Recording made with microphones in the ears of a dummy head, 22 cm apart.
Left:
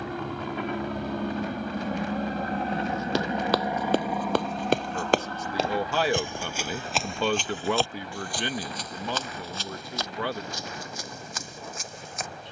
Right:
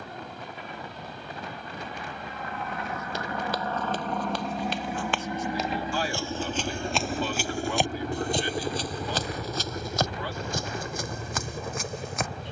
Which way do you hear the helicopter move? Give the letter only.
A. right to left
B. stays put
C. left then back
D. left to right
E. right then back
D.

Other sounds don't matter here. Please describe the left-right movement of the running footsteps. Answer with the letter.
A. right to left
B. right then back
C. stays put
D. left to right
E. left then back
D.